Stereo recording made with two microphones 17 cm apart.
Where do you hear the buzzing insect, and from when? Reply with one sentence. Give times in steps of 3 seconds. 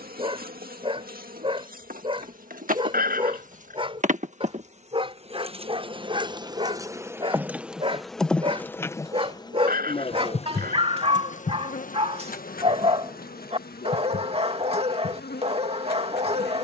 You can hear the buzzing insect on the right from 0 s, in the centre from 6 s and on the left from 9 s.